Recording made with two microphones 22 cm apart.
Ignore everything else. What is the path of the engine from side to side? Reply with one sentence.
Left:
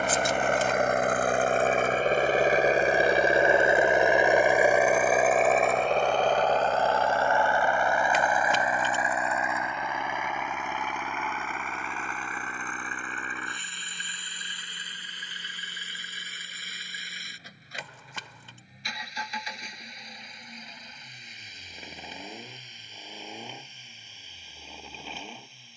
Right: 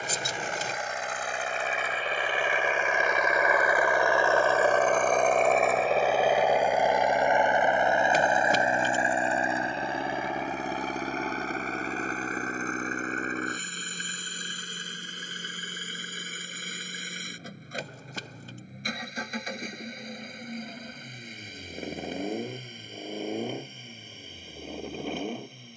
You can hear the engine travel towards the right.